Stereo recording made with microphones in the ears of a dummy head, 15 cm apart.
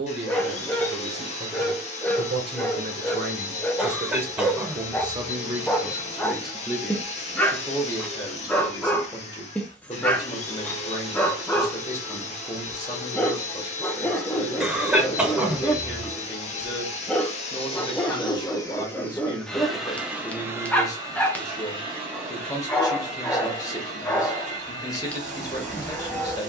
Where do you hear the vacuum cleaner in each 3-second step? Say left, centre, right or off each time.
left, left, left, left, left, left, centre, right, right.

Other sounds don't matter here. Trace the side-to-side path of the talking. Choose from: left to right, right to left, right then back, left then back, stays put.
right to left.